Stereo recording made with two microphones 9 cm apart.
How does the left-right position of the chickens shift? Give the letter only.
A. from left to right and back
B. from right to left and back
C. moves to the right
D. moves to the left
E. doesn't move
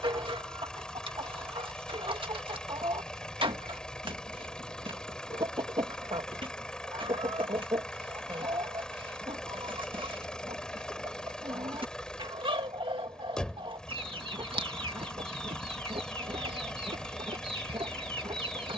E.